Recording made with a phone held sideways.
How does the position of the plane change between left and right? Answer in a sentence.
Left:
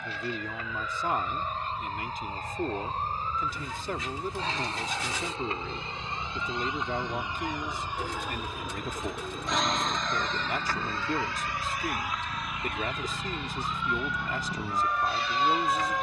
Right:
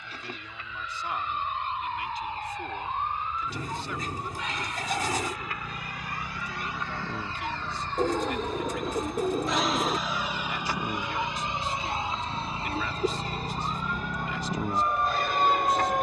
You can hear the plane move to the right.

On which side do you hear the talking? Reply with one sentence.
In this clip you hear the talking on the left.